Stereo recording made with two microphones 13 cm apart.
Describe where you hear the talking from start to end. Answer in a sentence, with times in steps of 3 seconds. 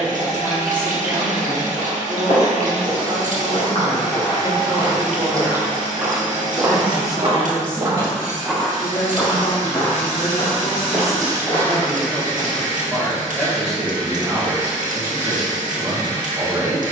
In this clip you hear the talking on the right from 0 s, in the centre from 6 s, on the left from 9 s, in the centre from 12 s and on the right from 15 s.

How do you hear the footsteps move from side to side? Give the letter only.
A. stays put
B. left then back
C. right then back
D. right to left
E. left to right
C.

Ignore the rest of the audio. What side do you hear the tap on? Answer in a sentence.
You can hear the tap on the right.